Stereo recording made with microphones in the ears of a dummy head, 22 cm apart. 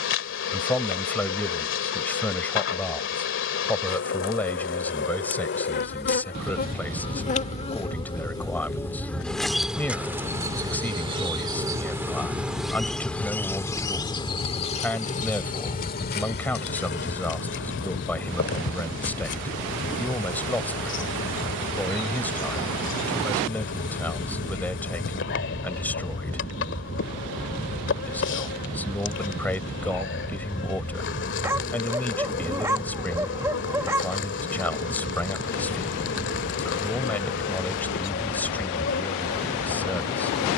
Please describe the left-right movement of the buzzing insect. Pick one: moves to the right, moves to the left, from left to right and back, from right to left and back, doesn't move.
from left to right and back.